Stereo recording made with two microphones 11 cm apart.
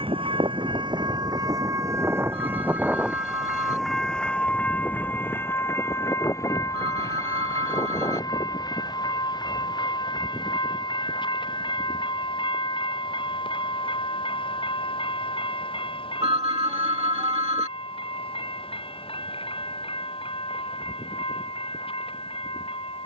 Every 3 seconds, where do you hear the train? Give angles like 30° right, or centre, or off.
40° right, 10° left, 30° left, 40° left, 50° left, 50° left, 60° left, 60° left.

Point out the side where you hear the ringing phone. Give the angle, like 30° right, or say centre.
70° right.